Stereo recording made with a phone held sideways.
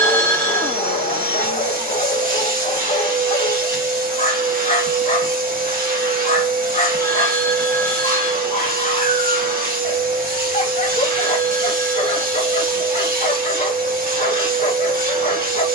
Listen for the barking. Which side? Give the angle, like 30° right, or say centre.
50° left.